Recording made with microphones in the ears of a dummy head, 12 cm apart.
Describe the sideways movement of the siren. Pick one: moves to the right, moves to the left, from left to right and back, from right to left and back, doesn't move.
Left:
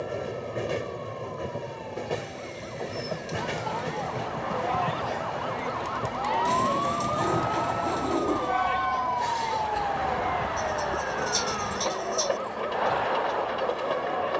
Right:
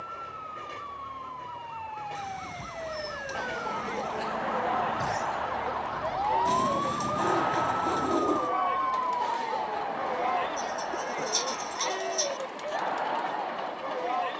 moves to the left.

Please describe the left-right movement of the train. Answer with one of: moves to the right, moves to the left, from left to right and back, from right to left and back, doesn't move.
doesn't move.